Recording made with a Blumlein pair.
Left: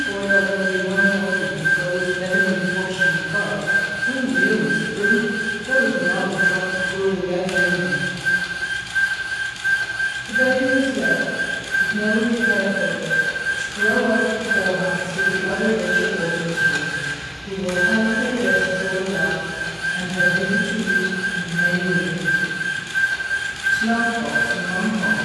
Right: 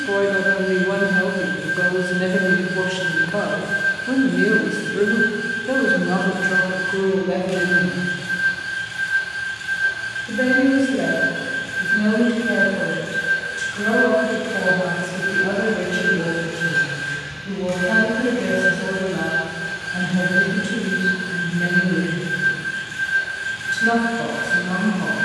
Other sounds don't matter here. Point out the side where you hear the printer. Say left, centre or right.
left.